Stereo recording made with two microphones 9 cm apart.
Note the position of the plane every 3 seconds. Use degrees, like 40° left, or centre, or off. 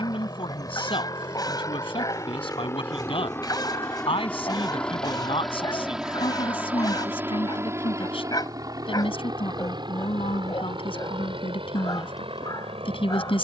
40° left, 10° left, 30° right, 50° right, 70° right.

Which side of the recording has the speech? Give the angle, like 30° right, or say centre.
80° left.